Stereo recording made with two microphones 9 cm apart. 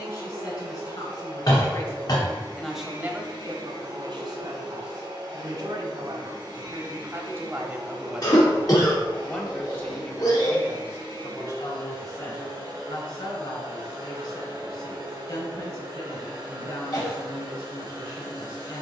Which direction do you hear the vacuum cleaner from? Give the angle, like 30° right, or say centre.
50° right.